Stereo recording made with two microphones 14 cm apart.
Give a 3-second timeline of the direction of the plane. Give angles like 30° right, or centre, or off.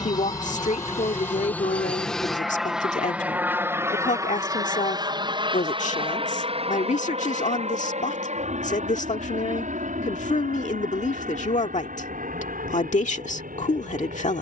10° left, 20° right, 50° right, 60° right, 60° right.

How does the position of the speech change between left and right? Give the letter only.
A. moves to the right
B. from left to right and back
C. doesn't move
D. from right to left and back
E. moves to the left
C.